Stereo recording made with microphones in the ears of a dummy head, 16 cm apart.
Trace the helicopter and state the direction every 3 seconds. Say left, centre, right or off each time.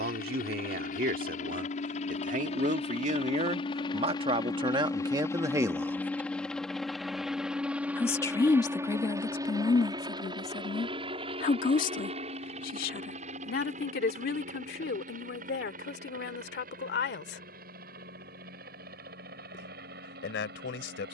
left, left, centre, right, right, right, right.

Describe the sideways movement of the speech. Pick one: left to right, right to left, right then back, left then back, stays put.
right to left.